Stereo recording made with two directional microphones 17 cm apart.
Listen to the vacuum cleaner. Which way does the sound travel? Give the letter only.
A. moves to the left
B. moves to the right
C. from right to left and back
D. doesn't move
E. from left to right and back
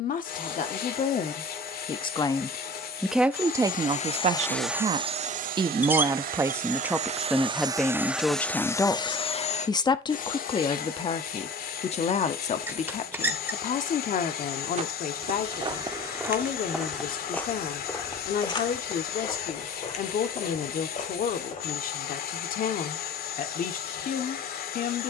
E.